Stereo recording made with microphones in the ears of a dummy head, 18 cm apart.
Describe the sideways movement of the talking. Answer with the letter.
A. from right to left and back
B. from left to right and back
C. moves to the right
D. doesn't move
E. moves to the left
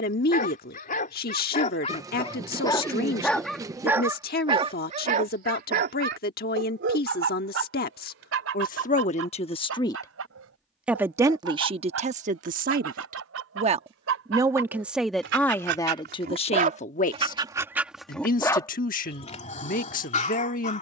B.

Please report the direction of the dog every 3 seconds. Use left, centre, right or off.
left, right, right, right, right, right, left.